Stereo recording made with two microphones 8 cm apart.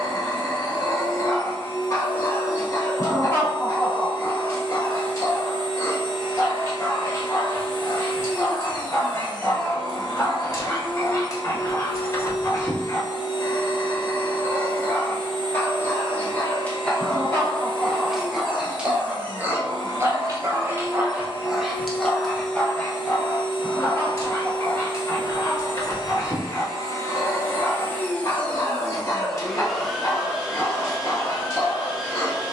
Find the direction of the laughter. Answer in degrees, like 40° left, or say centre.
30° left.